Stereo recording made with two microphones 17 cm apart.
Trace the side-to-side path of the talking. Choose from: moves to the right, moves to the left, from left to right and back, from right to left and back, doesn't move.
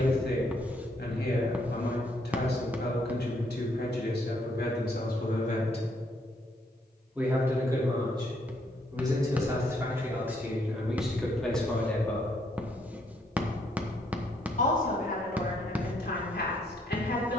from left to right and back.